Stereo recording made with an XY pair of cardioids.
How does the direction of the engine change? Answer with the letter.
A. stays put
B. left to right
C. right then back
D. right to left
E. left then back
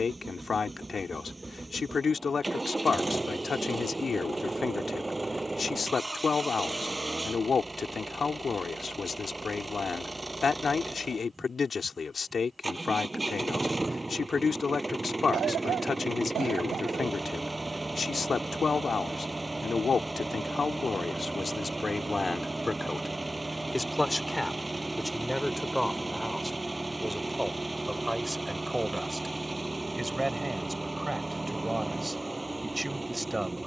A.